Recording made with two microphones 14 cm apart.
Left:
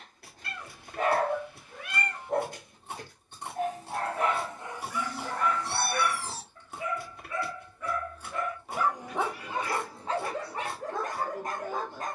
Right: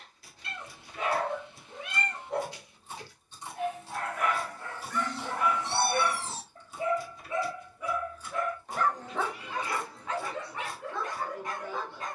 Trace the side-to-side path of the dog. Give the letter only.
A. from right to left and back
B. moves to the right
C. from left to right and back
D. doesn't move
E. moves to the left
C.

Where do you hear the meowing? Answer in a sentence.
In this clip you hear the meowing on the right.